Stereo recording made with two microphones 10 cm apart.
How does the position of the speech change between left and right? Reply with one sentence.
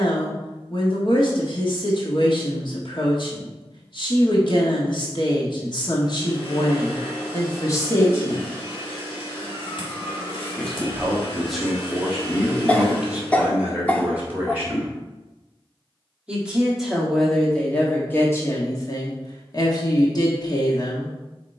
You can hear the speech move from left to right and back again.